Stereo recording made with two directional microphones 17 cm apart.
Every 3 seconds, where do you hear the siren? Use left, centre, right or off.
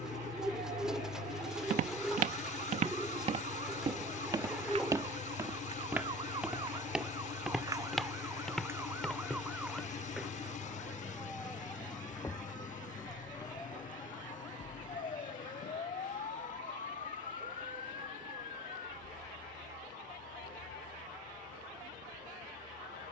right, right, right, centre, left, left, left, left.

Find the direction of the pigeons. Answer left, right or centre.
centre.